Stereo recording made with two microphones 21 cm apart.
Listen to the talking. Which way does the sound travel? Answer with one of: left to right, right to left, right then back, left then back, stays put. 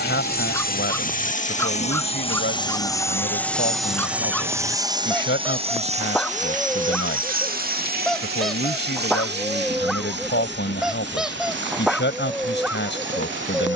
stays put.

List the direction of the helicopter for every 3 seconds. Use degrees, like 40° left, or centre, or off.
40° left, 10° right, 50° right, 60° right, 60° right.